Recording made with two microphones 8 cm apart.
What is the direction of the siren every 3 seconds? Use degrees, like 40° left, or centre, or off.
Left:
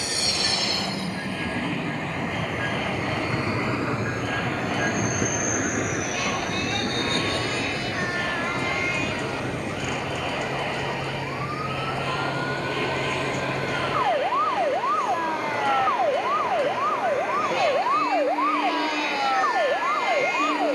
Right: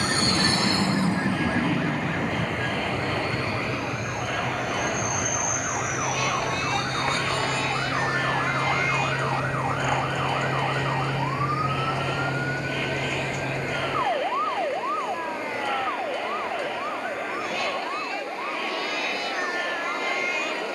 80° right, 70° right, 60° right, 40° right, centre, 30° left, 50° left.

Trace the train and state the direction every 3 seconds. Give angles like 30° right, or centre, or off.
20° right, 30° left, 50° left, 60° left, 70° left, 70° left, 70° left.